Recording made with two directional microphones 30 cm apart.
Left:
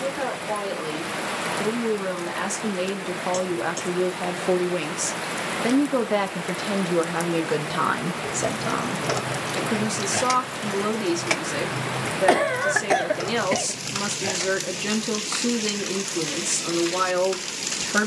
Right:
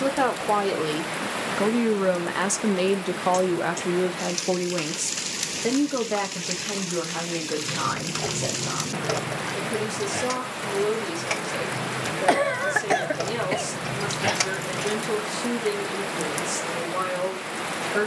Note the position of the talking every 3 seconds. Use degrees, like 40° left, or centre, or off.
40° right, centre, 30° left, 50° left, 50° left, 50° left.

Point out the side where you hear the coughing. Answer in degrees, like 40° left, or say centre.
centre.